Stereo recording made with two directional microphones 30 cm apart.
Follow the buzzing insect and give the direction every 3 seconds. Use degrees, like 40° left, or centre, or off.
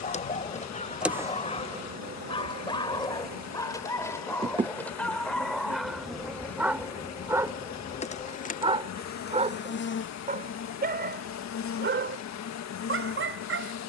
10° right, 20° right, 20° left, 40° left, 50° left.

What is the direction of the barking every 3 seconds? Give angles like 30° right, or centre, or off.
20° left, 10° left, 10° right, 30° right, 40° right.